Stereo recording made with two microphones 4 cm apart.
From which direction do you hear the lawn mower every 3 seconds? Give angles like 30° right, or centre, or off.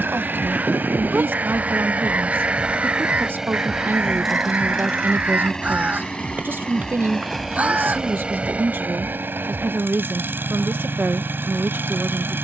40° right, centre, centre, 50° right.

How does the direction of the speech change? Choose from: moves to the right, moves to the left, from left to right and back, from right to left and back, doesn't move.
doesn't move.